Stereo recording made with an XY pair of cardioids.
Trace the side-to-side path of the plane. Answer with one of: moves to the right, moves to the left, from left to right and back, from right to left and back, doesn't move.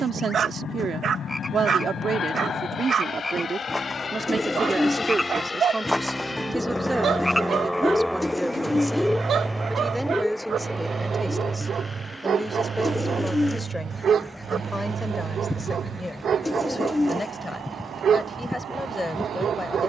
moves to the right.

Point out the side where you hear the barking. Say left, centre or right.
right.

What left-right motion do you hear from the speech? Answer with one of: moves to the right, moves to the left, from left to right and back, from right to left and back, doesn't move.
moves to the left.